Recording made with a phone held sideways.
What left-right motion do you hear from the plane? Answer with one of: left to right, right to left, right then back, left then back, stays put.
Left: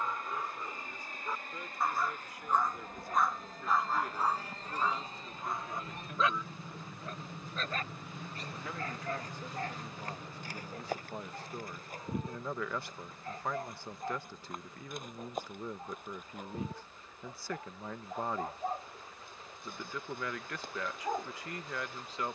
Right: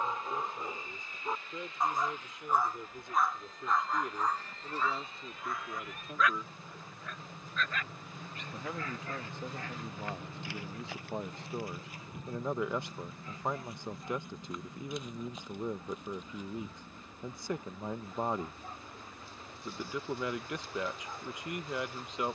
left to right.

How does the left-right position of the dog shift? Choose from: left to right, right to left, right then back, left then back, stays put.
right to left.